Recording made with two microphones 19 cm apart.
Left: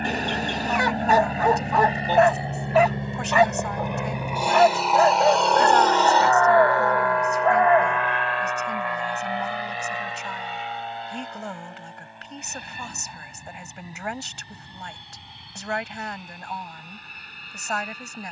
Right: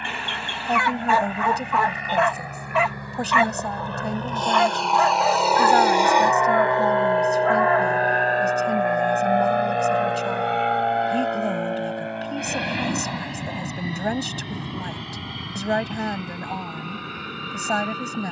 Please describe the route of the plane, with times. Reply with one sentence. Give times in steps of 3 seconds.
You can hear the plane on the left from 0 s, in the centre from 3 s and on the right from 6 s.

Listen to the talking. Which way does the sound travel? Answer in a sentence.
In this clip you hear the talking stay in one place.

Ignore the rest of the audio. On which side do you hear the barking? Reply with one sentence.
You can hear the barking on the left.